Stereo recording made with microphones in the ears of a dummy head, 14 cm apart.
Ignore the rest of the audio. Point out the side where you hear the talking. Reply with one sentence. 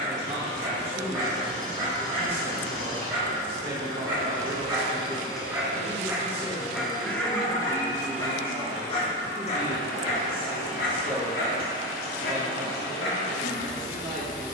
In this clip you hear the talking on the right.